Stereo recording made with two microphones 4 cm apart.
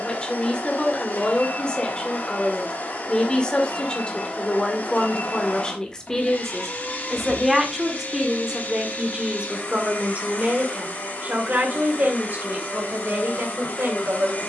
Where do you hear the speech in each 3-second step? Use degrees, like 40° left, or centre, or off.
20° left, 20° left, 10° right, 40° right, 60° right.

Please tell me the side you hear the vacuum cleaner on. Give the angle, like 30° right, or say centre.
50° left.